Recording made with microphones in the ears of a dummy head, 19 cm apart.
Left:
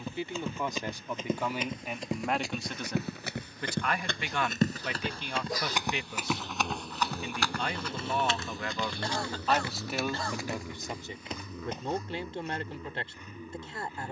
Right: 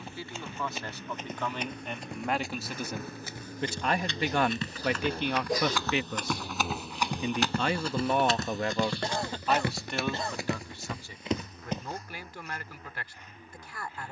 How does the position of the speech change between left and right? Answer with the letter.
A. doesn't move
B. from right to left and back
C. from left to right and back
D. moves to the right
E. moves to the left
C.